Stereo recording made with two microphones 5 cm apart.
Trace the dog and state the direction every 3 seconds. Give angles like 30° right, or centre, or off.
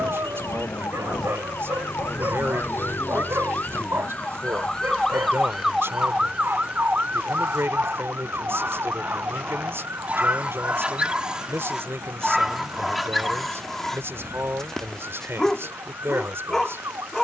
70° right, 60° right, 50° right, 30° right, centre, 10° left.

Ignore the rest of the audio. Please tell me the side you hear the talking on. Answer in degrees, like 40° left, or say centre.
60° right.